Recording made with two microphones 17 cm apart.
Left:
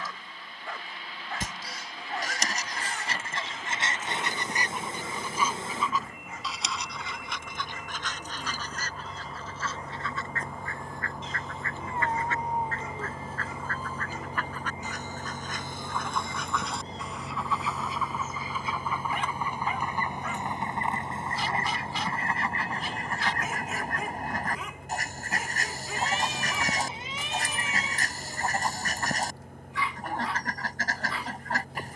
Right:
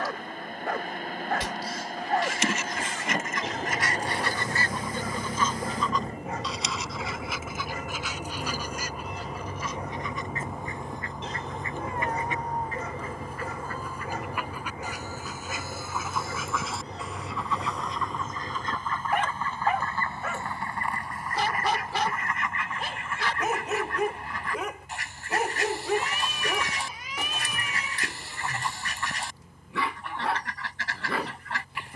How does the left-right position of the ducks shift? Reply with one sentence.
You can hear the ducks move from left to right and back again.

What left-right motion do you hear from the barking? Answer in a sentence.
You can hear the barking stay put.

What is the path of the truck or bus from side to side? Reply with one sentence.
You can hear the truck or bus move to the left.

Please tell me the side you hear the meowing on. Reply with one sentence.
You can hear the meowing on the left.